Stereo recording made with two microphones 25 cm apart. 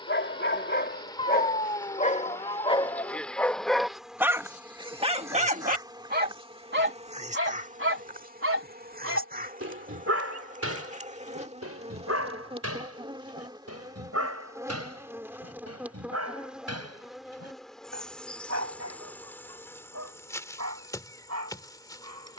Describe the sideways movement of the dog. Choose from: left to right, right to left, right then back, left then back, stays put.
left to right.